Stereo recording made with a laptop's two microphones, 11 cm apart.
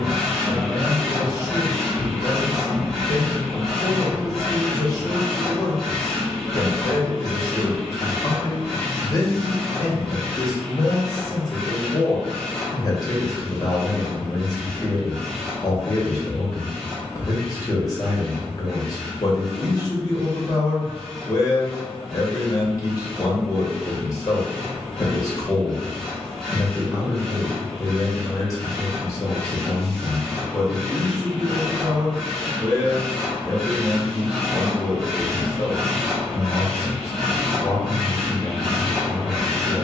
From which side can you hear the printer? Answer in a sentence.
You can hear the printer in the centre.